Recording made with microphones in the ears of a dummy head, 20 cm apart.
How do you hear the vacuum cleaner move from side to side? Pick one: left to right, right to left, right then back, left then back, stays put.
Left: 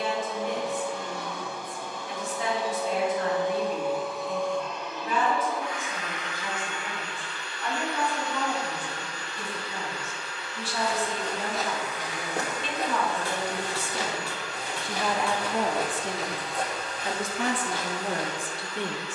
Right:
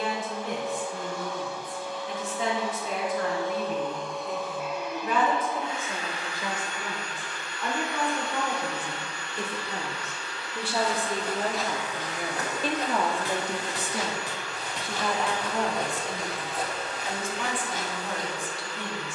left to right.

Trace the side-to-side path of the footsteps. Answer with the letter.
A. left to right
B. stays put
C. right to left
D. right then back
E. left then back
E.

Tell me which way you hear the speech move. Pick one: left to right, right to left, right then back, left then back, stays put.
right to left.